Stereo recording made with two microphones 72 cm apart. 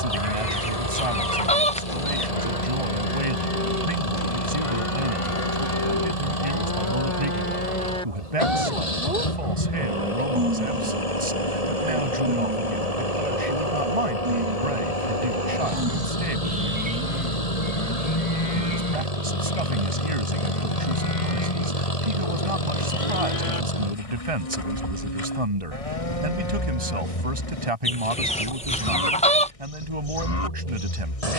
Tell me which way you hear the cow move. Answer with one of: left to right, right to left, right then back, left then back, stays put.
right then back.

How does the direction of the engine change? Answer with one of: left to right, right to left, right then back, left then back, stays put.
stays put.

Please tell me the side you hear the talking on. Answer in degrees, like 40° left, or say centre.
50° right.